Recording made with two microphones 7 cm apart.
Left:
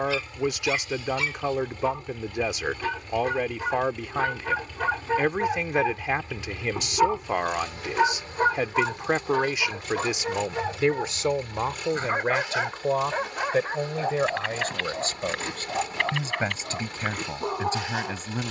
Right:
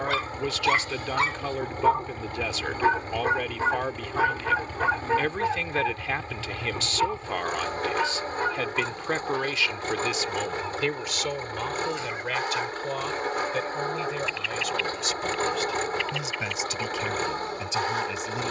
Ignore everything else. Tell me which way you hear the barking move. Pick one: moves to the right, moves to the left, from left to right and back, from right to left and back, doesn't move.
moves to the left.